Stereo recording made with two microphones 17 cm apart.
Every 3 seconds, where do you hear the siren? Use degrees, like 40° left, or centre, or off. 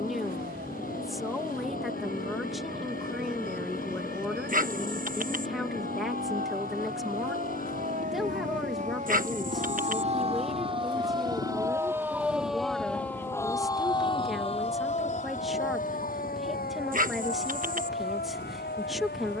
70° right, 60° right, 60° right, 30° right, 20° left, 60° left, 70° left.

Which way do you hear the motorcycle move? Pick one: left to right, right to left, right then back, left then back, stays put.
stays put.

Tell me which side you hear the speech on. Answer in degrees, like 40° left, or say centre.
centre.